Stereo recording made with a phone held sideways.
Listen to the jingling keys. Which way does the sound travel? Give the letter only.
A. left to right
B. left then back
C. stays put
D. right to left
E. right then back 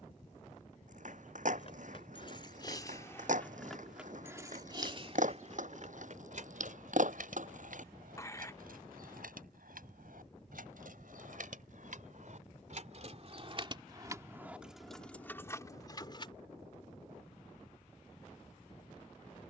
E.